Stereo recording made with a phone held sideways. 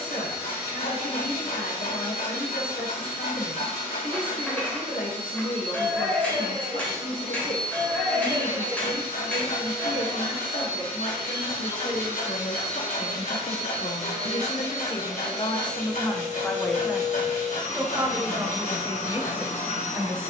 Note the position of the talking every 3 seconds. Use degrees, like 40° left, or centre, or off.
80° left, 80° left, 80° left, 80° left, 70° left, 20° left, 20° right.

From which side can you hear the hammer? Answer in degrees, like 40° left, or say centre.
10° left.